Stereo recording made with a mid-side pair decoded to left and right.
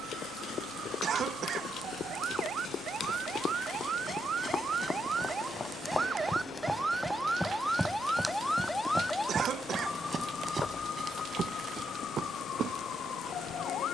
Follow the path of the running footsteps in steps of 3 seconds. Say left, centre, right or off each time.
left, left, centre, right, right.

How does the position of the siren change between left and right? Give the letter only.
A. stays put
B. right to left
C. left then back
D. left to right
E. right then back
B.